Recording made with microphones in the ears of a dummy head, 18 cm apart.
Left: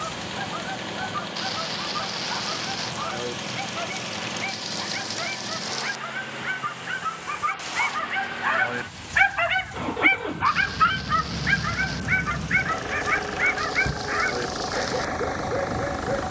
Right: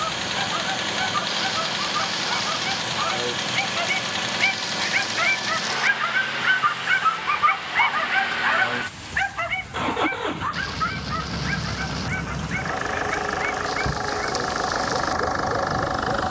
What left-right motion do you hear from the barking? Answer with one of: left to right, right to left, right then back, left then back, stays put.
right to left.